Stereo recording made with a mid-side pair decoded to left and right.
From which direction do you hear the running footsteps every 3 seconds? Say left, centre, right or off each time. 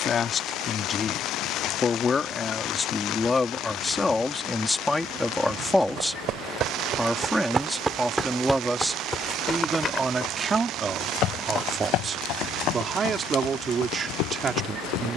off, off, right, left, left.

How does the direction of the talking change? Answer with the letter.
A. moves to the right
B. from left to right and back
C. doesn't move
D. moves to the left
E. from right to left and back
A.